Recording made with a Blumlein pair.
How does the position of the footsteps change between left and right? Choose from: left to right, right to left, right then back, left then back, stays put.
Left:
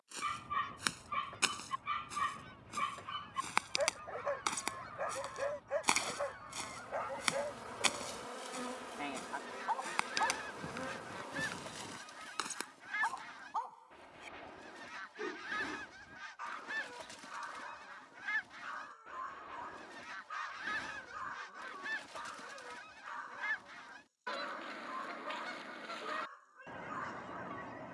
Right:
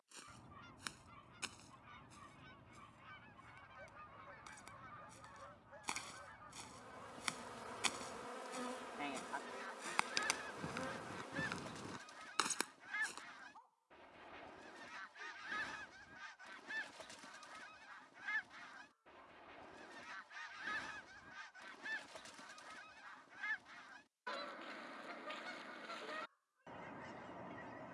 left to right.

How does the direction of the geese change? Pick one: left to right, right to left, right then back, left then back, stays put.
stays put.